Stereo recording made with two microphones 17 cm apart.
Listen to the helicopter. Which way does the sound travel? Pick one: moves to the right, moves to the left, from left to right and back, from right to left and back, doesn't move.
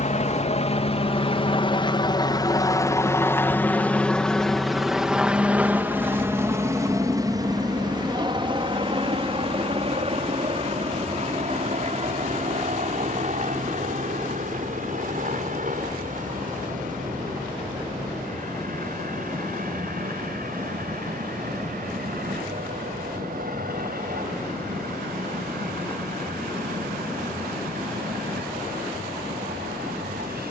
moves to the right.